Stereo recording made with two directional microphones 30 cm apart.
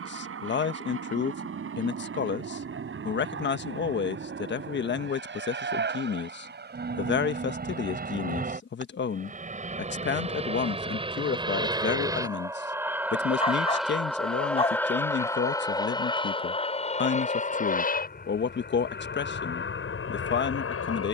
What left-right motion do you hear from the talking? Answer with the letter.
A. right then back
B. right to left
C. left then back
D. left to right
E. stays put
E.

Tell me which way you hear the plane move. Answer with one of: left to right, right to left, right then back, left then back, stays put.
right to left.